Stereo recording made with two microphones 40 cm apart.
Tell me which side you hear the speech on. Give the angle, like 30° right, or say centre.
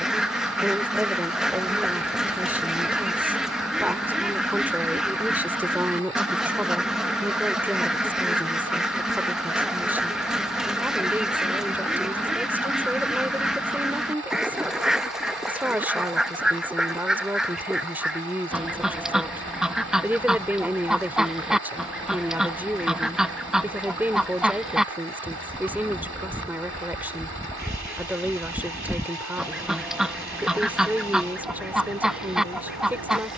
centre.